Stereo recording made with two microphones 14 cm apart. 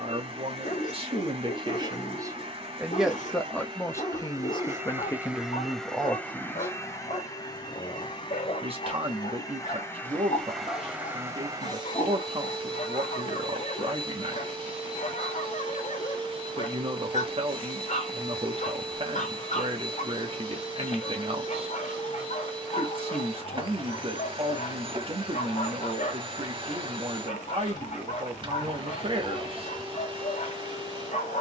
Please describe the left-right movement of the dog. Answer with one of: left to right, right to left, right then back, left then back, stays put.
stays put.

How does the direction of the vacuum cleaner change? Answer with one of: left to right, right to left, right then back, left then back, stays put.
left then back.